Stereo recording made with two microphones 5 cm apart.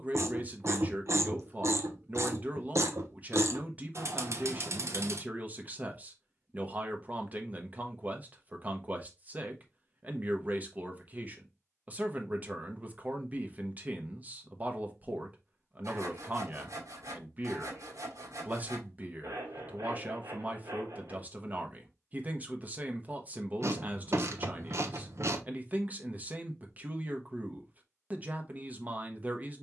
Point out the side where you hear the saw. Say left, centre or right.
right.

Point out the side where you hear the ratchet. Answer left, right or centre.
right.